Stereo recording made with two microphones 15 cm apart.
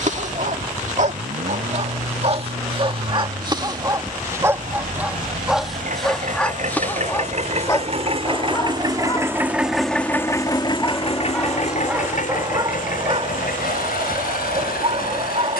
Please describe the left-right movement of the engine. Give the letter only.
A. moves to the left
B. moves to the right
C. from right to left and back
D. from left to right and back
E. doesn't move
A.